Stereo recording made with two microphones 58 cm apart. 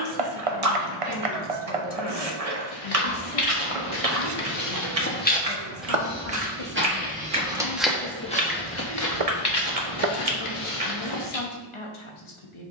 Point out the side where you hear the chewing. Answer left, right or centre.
right.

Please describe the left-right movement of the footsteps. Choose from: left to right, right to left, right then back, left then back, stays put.
right then back.